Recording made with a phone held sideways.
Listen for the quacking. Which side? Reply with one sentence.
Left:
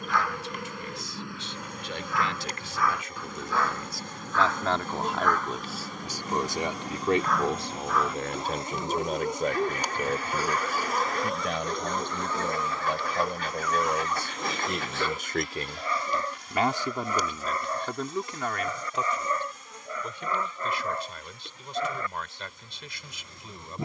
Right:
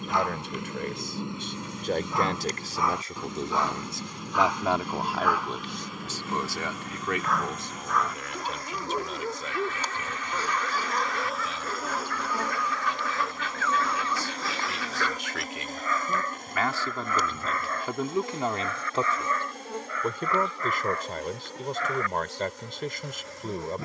You can hear the quacking on the left.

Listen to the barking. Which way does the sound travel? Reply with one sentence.
You can hear the barking move from right to left.